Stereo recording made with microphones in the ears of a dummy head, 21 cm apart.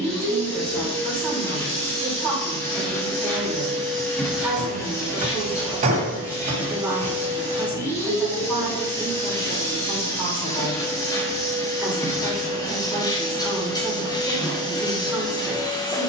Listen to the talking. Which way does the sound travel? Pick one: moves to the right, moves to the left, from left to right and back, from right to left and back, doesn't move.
doesn't move.